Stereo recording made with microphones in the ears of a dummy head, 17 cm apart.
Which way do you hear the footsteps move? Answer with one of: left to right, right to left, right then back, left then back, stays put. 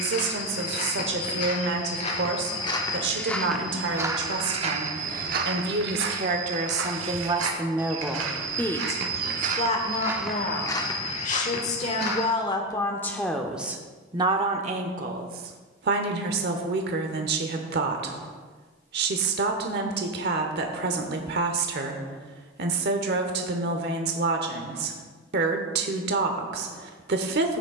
right then back.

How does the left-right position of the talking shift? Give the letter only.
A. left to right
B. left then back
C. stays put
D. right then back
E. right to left
B.